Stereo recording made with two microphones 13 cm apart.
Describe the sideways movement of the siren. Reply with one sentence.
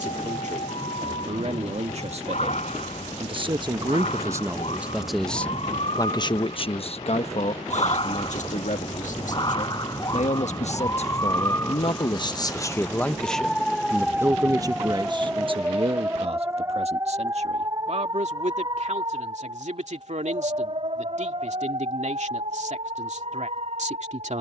In this clip you hear the siren move to the right.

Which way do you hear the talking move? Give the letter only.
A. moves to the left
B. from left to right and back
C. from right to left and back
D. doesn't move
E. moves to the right
C.